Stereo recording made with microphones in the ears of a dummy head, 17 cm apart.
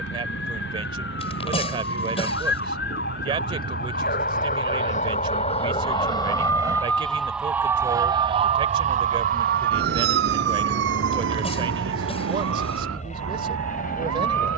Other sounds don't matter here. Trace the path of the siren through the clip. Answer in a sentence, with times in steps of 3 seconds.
You can hear the siren on the left from 0 s, in the centre from 6 s and on the right from 9 s.